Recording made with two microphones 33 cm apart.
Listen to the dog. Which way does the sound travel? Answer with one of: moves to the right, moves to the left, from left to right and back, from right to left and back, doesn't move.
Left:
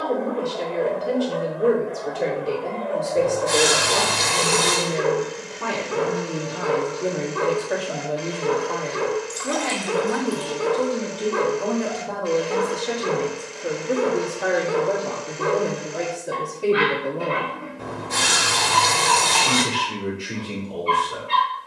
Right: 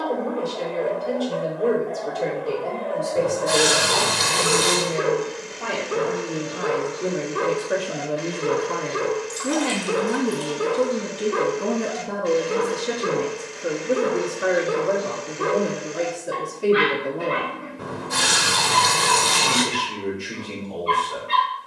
moves to the right.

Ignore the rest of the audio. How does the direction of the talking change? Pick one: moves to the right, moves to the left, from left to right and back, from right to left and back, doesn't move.
from left to right and back.